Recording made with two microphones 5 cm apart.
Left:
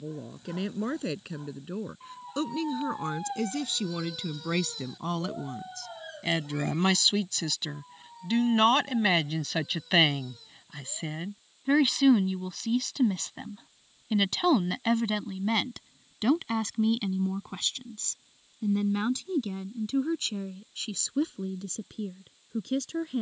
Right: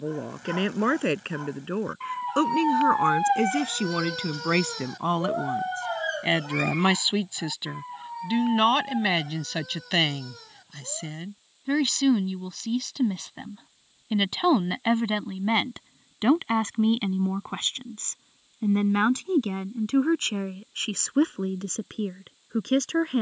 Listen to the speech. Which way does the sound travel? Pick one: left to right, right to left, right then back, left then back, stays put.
left then back.